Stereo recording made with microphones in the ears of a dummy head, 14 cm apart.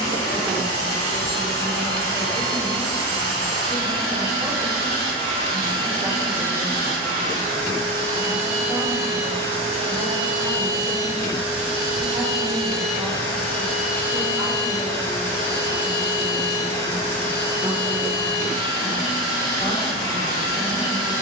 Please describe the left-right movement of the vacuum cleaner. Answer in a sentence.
You can hear the vacuum cleaner move to the left.